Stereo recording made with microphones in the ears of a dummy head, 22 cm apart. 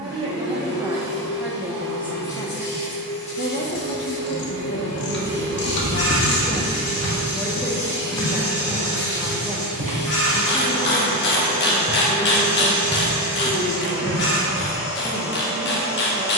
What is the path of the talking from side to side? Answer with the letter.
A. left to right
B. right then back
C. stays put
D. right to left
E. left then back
E.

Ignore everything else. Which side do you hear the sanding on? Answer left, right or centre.
left.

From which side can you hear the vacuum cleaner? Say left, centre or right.
left.